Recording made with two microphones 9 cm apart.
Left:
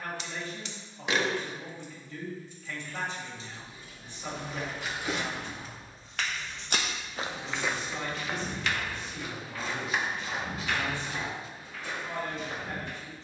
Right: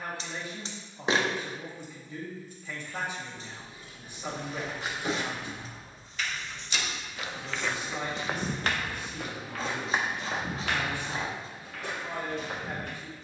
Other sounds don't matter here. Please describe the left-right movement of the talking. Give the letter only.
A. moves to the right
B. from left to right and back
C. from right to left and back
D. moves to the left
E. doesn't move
E.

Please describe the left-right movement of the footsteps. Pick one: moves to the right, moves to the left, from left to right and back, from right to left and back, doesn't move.
moves to the right.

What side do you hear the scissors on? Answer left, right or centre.
right.